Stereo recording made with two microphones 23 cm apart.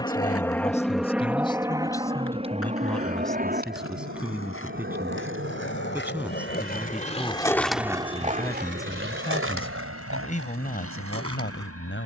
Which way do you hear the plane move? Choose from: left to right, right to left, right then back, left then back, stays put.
left to right.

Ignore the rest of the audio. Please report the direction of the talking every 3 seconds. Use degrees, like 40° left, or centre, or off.
20° left, centre, centre, 40° left.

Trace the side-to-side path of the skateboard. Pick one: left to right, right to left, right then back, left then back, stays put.
left to right.